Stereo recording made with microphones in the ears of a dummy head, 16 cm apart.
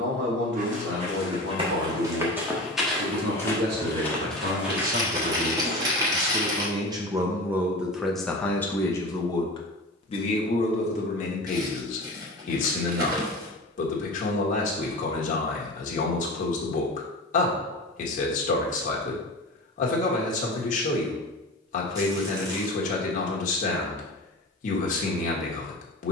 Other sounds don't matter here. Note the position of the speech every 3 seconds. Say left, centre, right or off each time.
right, right, centre, left, left, left, left, left, left.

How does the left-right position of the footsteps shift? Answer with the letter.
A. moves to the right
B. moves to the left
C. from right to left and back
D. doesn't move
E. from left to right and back
C.